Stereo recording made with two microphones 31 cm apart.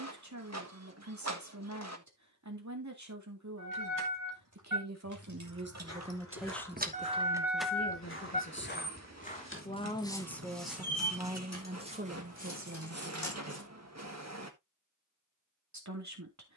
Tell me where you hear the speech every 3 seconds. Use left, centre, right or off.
right, right, left, centre, right, right.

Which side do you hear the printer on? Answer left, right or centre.
right.